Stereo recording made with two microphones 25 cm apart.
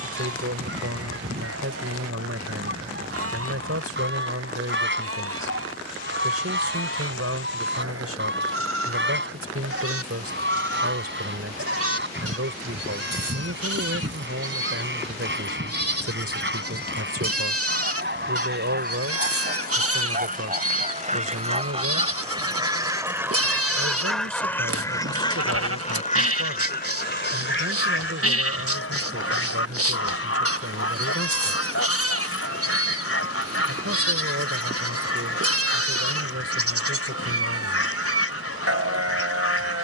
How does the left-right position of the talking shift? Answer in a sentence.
In this clip you hear the talking stay put.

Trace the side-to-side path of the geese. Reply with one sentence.
In this clip you hear the geese go from the right side to the left.